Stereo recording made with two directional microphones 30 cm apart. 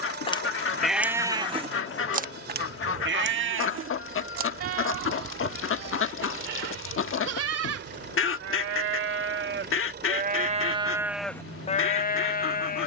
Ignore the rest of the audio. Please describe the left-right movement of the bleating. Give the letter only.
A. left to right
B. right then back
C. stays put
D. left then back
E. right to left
B.